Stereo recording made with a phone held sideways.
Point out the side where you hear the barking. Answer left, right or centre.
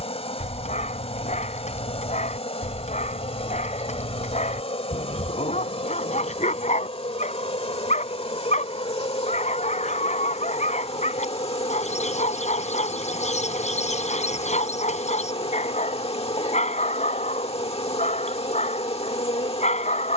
left.